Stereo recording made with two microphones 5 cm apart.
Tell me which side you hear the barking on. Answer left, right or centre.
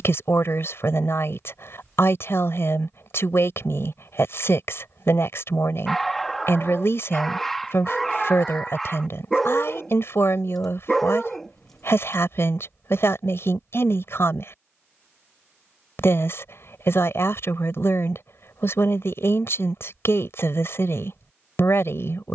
centre.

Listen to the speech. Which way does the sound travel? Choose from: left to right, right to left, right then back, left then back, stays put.
stays put.